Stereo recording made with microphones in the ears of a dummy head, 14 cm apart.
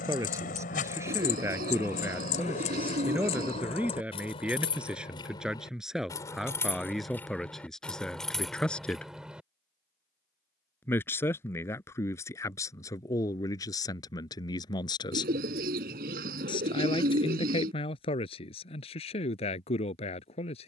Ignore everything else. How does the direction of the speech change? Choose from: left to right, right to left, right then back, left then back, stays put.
right to left.